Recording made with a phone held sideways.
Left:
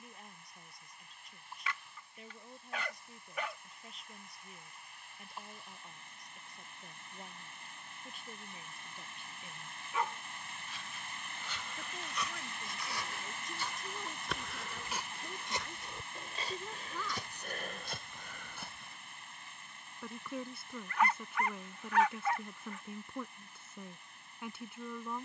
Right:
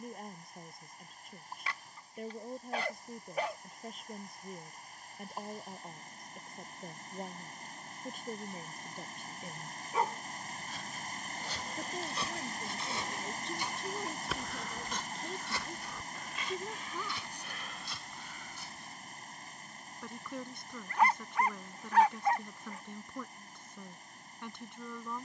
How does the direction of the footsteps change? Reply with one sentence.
In this clip you hear the footsteps go from the right side to the left.